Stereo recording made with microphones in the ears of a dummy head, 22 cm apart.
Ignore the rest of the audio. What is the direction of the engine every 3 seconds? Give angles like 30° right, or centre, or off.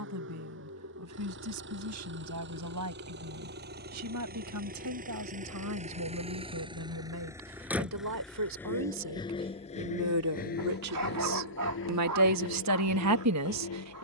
50° right, 40° right, 10° right, 40° left, 60° left.